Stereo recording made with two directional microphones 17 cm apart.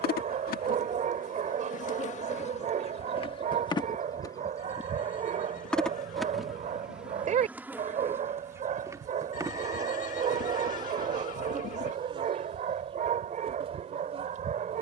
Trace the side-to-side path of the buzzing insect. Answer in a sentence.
You can hear the buzzing insect travel towards the right.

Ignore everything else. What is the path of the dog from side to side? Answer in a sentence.
You can hear the dog stay in one place.